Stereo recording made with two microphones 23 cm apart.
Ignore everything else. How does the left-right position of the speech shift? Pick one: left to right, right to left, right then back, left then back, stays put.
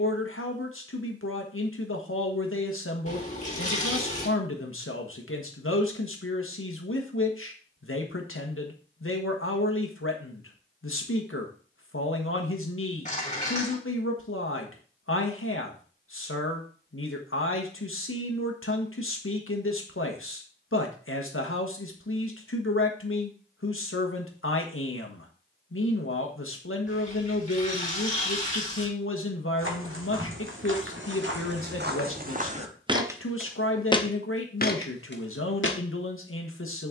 stays put.